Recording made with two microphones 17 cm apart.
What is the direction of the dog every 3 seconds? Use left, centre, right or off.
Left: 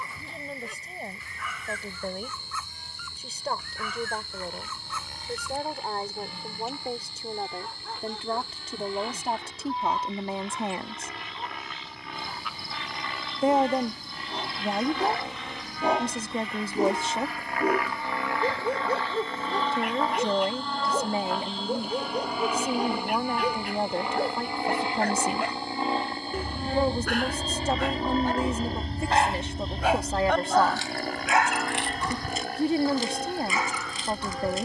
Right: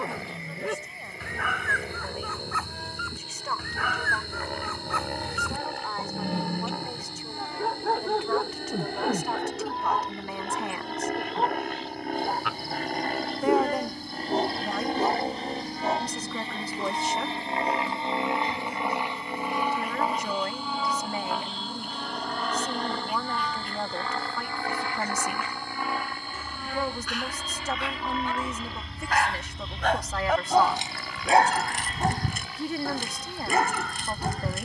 right, right, right, right, right, left, left, left, left, left, right, right.